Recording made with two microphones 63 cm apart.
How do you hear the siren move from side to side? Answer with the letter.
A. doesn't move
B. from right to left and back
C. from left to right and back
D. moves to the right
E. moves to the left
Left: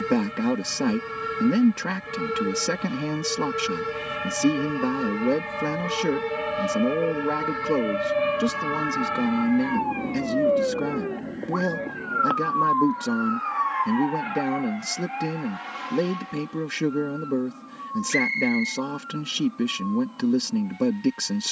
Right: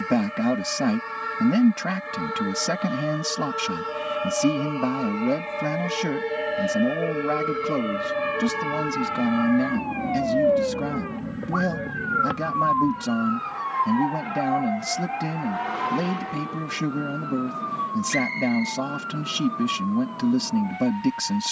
D.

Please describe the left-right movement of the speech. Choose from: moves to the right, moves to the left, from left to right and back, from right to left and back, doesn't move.
doesn't move.